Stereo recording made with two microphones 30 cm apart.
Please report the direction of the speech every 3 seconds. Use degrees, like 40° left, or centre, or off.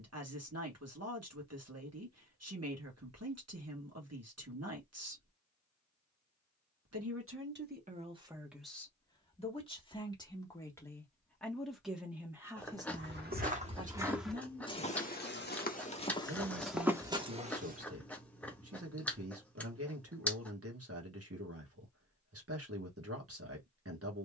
60° right, 60° right, 20° right, 10° left, 20° right, 50° right, 50° right, 50° right.